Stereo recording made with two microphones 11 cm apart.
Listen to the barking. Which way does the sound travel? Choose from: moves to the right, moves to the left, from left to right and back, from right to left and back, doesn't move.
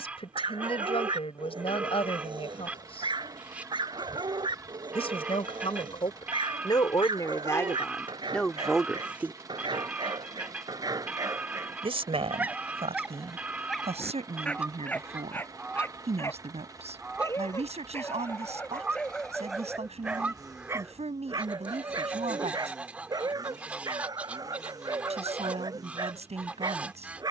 from right to left and back.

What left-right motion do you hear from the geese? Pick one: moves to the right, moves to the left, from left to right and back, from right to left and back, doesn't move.
doesn't move.